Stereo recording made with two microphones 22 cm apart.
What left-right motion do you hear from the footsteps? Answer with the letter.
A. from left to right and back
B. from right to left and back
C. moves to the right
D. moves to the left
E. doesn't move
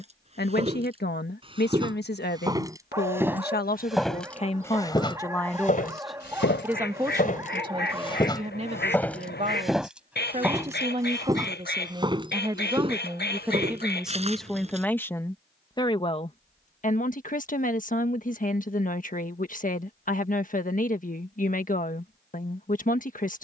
B.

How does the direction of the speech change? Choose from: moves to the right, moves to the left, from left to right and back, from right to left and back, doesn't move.
from left to right and back.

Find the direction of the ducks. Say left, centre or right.
left.